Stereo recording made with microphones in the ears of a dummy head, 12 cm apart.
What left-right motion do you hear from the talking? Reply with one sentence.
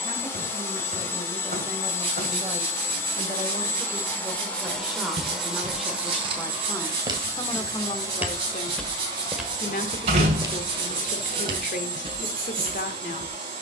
You can hear the talking travel towards the left.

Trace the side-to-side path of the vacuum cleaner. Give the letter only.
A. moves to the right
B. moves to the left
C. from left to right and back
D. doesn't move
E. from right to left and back
A.